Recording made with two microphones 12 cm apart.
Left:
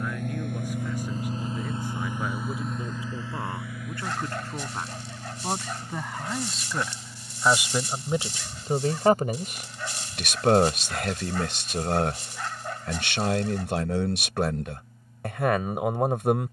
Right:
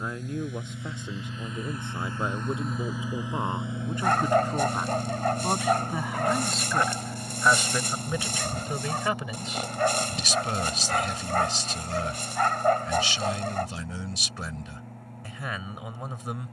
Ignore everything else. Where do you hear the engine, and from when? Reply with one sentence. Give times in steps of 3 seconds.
In this clip you hear the engine on the left from 0 s and on the right from 3 s.